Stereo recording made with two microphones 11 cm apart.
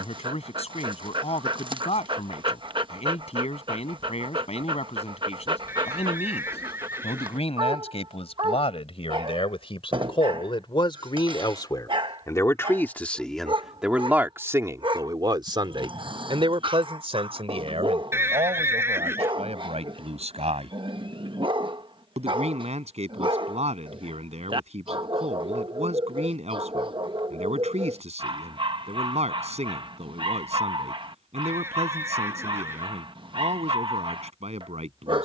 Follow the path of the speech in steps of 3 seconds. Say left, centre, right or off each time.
left, left, left, left, centre, right, right, right, right, right, right, right.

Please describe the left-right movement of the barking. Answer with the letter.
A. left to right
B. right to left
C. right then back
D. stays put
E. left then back
D.